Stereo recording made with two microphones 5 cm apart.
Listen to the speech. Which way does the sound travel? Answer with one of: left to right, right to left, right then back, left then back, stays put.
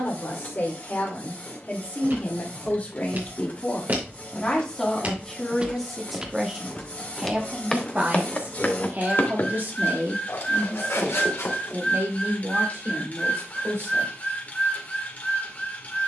left to right.